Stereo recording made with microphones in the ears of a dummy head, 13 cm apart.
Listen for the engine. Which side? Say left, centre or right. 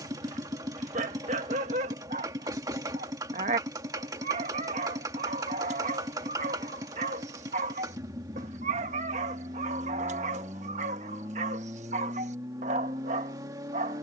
right.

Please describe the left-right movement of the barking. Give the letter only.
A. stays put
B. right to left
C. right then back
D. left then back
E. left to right
A.